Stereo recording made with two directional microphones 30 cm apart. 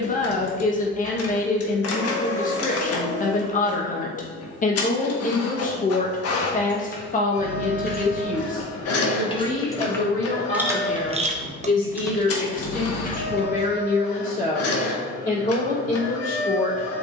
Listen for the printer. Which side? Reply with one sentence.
You can hear the printer on the left.